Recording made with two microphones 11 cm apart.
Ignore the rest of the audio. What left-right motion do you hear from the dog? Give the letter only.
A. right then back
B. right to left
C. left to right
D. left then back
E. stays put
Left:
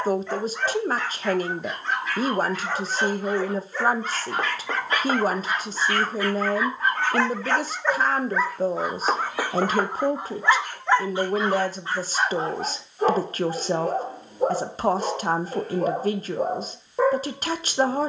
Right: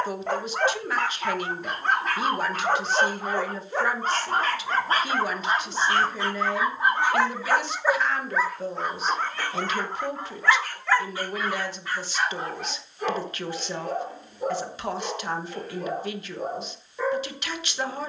B.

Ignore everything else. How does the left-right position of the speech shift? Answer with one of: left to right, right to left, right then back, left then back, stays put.
stays put.